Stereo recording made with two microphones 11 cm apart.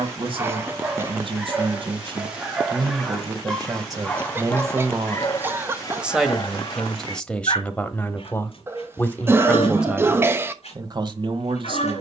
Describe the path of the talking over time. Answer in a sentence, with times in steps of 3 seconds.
You can hear the talking on the right from 0 s, in the centre from 6 s and on the right from 9 s.